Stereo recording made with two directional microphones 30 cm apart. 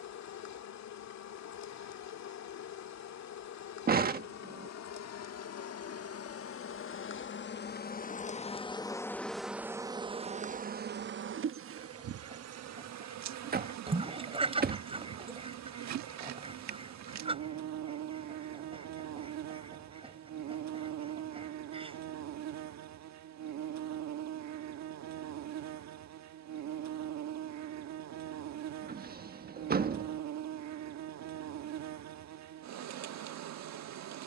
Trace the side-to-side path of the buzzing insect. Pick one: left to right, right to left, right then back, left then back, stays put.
left to right.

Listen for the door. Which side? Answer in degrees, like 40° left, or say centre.
30° right.